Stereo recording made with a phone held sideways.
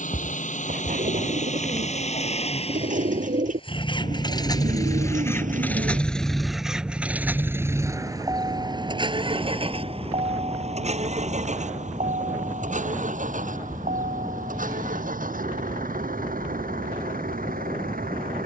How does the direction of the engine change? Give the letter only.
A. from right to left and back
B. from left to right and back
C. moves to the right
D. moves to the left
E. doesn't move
C.